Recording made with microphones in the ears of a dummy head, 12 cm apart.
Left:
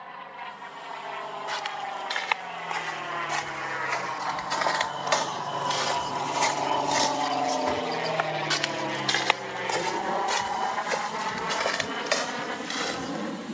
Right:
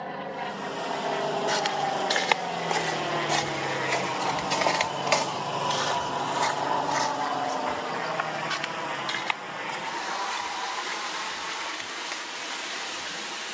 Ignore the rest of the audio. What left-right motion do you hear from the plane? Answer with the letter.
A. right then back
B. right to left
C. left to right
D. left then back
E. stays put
B.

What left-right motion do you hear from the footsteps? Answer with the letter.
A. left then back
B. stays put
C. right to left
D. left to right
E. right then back
C.